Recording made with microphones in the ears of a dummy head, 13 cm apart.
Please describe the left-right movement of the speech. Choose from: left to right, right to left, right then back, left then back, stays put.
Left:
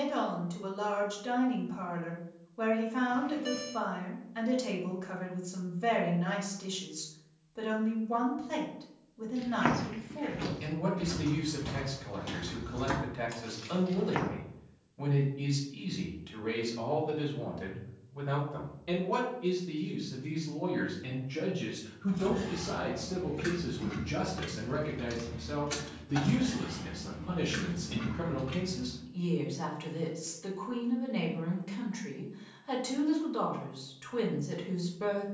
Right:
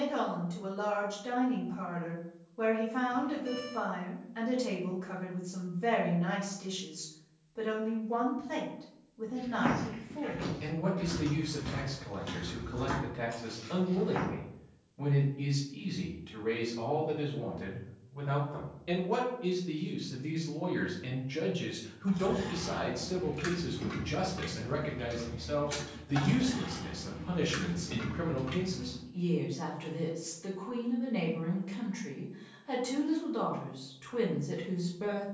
right then back.